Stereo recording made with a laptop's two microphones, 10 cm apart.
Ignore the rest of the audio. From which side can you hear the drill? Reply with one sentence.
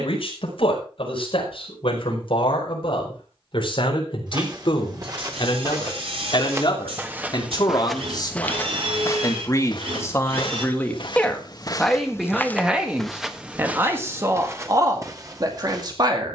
You can hear the drill on the right.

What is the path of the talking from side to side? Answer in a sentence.
In this clip you hear the talking go from the left side to the right.